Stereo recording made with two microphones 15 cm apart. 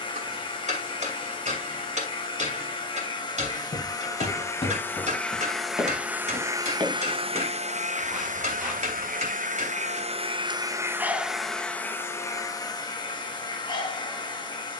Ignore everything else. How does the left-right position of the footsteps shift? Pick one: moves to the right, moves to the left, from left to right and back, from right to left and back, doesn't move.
moves to the right.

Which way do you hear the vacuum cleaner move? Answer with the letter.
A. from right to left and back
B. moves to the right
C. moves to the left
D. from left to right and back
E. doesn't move
D.